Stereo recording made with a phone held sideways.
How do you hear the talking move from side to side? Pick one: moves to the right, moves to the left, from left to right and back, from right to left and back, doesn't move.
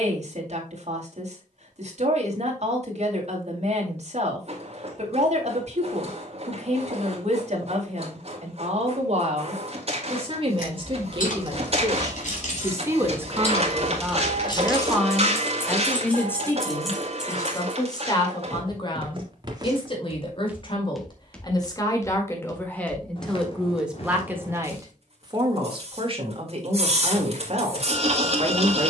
from right to left and back.